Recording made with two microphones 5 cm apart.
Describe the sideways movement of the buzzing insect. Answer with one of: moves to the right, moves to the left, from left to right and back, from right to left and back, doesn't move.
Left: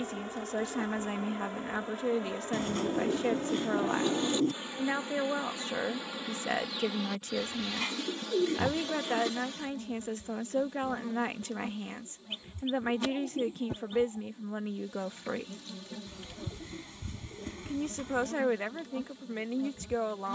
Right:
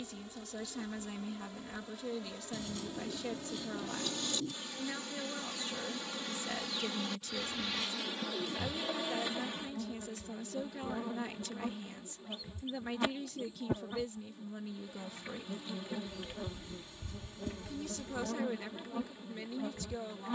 moves to the right.